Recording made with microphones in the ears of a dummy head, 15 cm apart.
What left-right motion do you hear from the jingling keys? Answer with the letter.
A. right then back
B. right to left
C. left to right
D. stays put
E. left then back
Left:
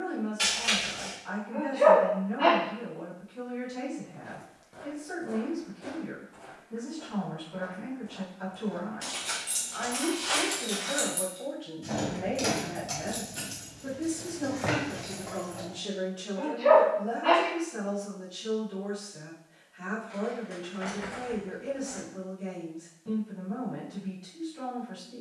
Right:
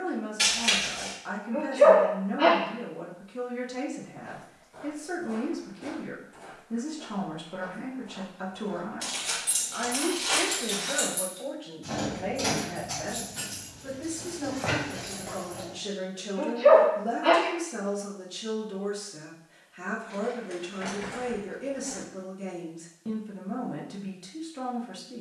E.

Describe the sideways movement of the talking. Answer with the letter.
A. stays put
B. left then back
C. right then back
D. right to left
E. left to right
B.